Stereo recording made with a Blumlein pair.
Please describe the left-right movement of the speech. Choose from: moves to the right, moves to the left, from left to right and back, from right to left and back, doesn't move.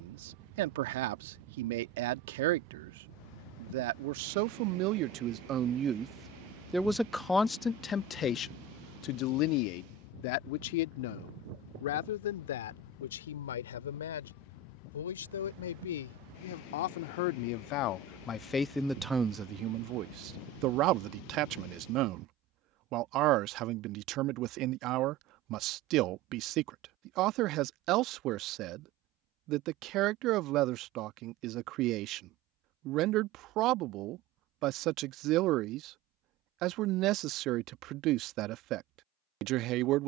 from right to left and back.